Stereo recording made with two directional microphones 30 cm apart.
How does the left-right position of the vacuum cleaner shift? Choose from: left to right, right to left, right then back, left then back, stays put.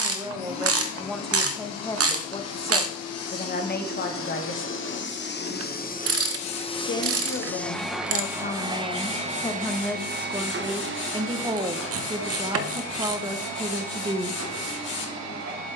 left to right.